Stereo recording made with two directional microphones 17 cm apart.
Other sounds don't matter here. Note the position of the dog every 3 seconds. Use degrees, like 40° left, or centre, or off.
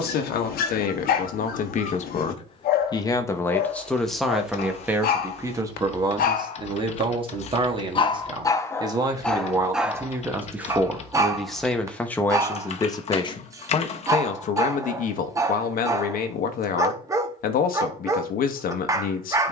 60° left, 60° left, 30° left, 10° right, 20° right, 20° right, 20° right.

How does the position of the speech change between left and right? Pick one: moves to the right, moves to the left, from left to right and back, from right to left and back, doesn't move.
from left to right and back.